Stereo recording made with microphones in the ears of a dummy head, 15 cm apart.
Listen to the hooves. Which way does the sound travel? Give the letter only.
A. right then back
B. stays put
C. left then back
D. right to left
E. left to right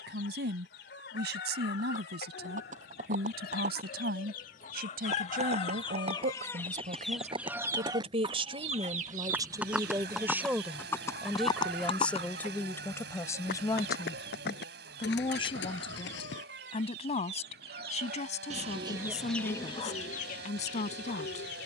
D.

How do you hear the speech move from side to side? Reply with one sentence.
In this clip you hear the speech travel towards the left.